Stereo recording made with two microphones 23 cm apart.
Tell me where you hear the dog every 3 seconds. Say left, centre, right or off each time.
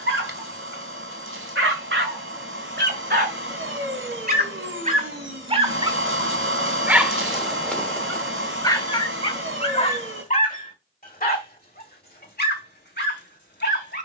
right, right, centre, left, left.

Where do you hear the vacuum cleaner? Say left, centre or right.
right.